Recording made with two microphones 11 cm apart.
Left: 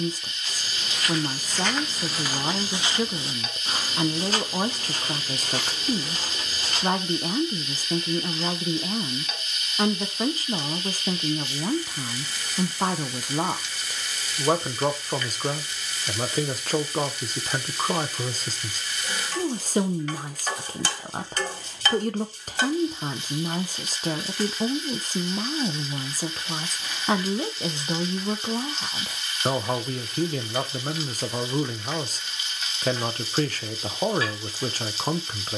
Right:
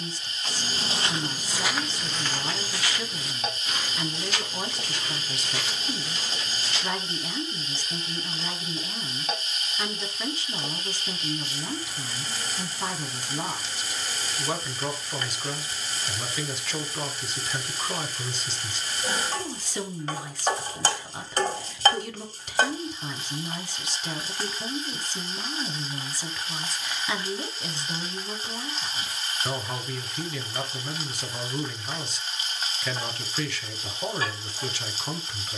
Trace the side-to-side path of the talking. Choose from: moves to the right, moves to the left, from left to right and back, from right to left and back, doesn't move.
doesn't move.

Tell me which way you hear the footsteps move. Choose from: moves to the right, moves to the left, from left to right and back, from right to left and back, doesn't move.
moves to the left.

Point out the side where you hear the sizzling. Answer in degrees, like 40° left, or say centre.
30° right.